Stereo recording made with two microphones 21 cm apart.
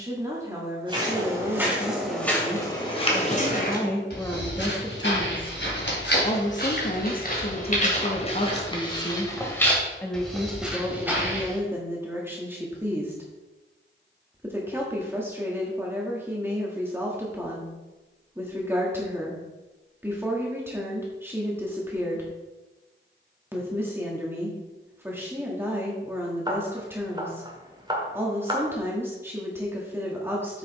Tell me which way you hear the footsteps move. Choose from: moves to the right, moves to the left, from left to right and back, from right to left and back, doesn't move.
from right to left and back.